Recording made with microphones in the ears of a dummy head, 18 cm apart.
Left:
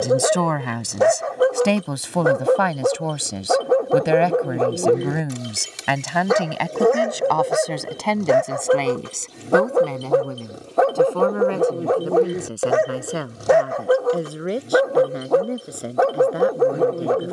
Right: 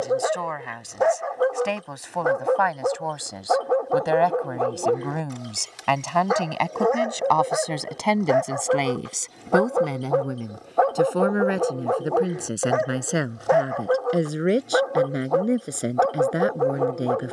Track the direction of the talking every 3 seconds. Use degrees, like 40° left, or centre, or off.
50° left, 30° left, centre, 10° right, 20° right, 20° right.